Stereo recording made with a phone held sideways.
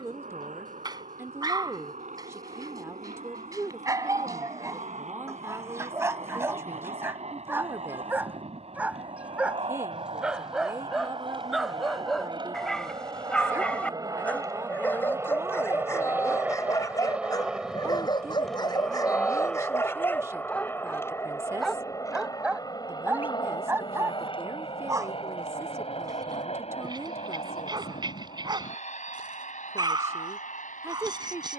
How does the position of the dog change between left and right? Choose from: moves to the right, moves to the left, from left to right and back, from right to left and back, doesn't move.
from right to left and back.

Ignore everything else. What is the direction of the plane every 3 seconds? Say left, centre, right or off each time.
right, right, right, right, right, centre, centre, left, left, left, left.